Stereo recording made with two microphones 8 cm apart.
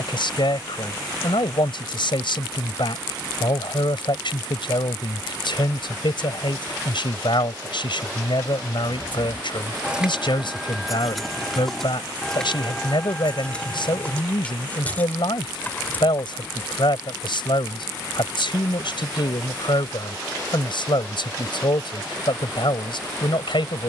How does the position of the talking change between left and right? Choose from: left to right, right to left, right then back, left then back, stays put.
stays put.